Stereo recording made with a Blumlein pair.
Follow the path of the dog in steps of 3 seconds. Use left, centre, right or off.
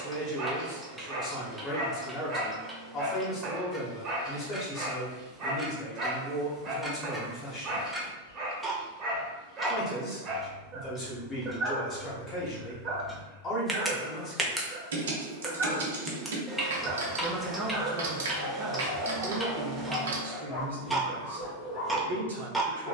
right, right, right, right, right, right, centre, left.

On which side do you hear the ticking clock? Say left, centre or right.
centre.